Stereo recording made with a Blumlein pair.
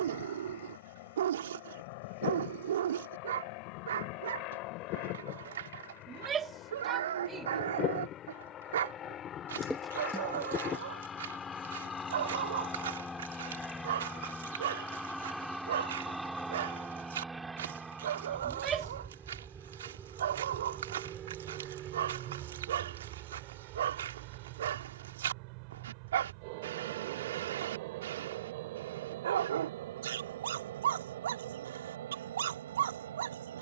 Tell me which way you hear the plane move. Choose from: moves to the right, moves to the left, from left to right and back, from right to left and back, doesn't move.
moves to the right.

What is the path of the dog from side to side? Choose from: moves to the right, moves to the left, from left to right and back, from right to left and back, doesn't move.
doesn't move.